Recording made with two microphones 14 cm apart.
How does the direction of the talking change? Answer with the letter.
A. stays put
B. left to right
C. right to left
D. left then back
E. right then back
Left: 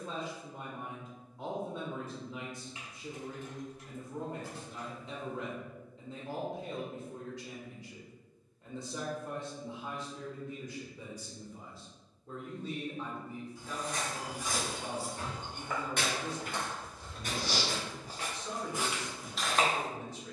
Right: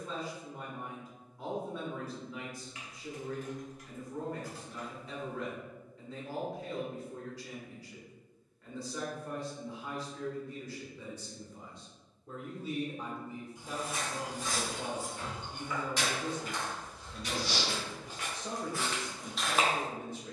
B.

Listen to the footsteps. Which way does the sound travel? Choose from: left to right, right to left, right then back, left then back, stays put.
left then back.